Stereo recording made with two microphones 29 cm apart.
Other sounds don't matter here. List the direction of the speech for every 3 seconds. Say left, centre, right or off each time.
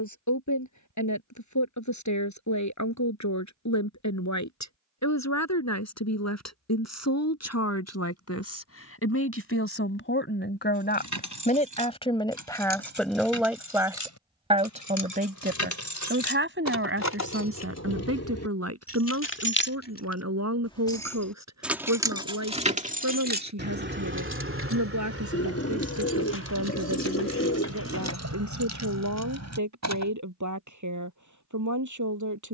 left, left, left, left, centre, right, right, right, right, right, right.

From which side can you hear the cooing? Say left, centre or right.
left.